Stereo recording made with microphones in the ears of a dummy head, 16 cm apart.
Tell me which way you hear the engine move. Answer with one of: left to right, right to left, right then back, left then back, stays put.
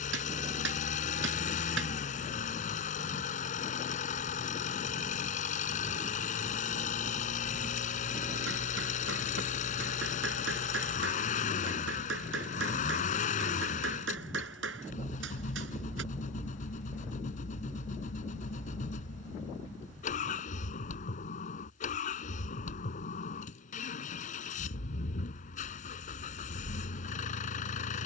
stays put.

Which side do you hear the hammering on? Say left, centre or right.
right.